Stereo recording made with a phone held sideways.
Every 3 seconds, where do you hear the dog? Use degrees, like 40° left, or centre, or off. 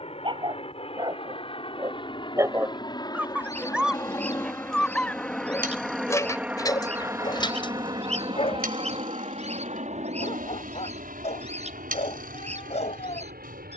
30° right, centre, 30° left, 50° left, 50° left.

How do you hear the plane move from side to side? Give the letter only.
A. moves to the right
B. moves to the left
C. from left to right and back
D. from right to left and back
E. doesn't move
A.